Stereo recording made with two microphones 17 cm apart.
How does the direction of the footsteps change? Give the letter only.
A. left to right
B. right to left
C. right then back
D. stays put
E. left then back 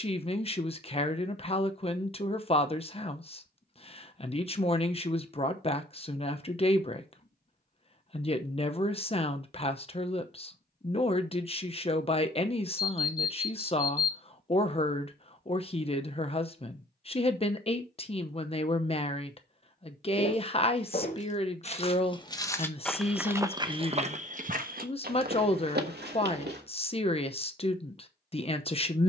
A.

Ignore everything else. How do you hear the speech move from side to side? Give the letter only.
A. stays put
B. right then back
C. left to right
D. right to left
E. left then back
A.